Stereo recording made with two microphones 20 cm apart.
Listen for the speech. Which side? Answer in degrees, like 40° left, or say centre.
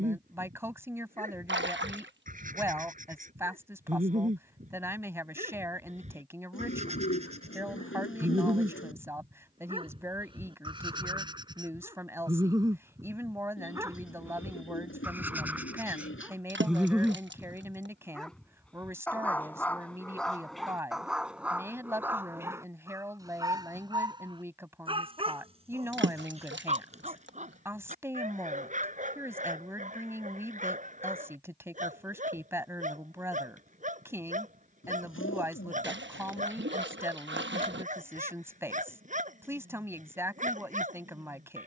10° right.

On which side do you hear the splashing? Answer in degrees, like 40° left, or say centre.
60° right.